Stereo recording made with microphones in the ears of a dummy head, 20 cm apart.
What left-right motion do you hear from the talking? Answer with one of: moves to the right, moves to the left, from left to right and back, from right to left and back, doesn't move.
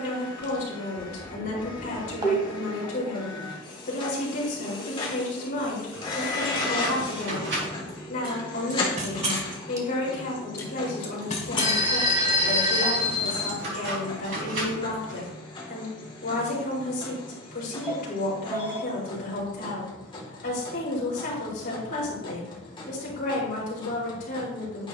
doesn't move.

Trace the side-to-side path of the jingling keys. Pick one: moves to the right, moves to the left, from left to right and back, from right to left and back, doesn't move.
from right to left and back.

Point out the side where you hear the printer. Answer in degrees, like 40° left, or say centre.
20° left.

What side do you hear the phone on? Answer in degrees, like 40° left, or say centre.
20° right.